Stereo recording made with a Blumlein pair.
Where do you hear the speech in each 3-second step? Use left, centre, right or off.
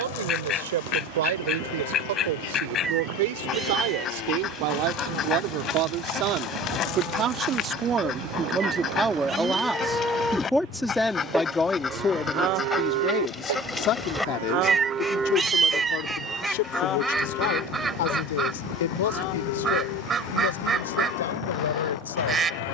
right, right, right, centre, left, left, left, left.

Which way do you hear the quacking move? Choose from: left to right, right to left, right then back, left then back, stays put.
left to right.